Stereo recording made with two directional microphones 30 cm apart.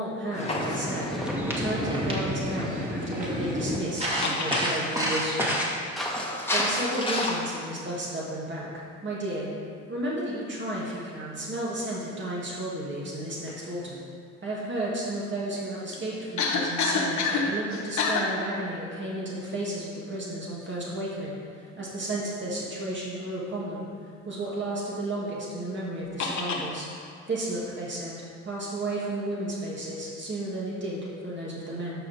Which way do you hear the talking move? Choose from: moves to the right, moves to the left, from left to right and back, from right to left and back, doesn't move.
doesn't move.